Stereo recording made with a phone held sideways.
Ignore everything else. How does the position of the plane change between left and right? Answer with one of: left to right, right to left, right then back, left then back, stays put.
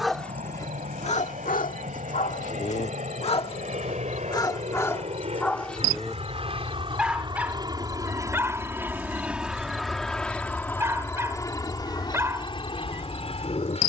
right to left.